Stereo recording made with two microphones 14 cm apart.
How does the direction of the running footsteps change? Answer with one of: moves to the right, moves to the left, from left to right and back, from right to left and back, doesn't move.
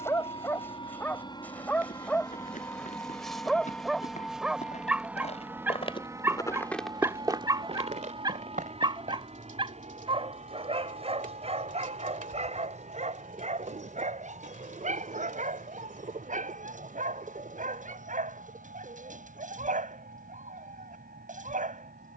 moves to the right.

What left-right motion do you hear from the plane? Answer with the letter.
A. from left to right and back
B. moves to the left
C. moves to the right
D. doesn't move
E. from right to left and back
C.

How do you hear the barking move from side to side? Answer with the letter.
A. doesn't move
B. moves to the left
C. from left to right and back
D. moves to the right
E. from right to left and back
D.